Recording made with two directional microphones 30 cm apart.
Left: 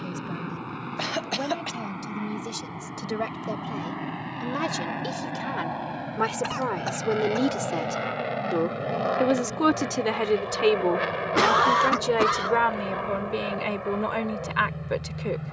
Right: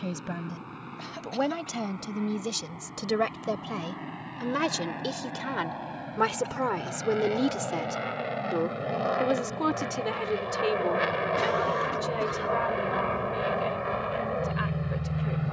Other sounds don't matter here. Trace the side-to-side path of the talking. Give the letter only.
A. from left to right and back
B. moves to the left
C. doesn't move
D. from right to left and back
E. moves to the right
B.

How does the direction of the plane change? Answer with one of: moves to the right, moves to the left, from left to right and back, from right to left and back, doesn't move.
moves to the right.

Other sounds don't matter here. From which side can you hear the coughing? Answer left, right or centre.
left.